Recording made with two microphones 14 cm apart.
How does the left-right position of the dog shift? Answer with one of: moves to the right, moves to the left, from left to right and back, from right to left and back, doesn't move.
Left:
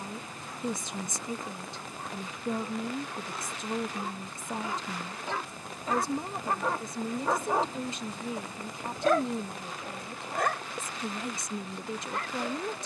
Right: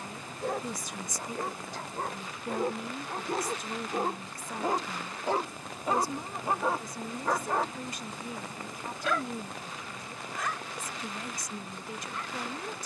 moves to the left.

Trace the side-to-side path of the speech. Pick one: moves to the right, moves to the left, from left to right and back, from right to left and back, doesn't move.
doesn't move.